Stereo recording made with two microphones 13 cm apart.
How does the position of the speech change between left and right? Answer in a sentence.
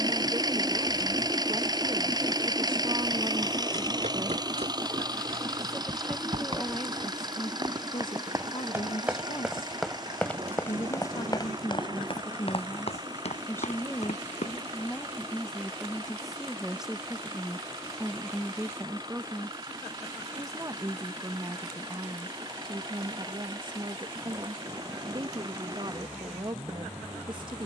In this clip you hear the speech go left and come back.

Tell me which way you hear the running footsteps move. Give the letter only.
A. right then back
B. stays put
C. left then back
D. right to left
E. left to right
D.